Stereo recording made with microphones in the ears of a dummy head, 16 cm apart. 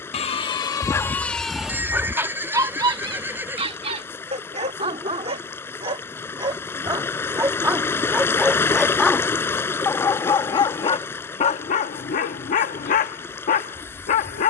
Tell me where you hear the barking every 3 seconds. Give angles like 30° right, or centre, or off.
centre, 30° right, 10° right, 30° left, 40° left.